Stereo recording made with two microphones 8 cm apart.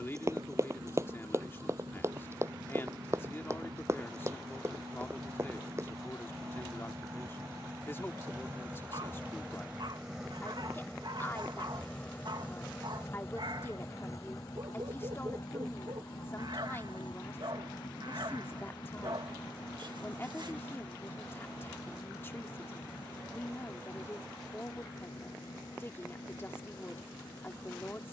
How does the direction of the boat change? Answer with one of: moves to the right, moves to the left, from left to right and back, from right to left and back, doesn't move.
moves to the left.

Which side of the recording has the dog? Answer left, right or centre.
right.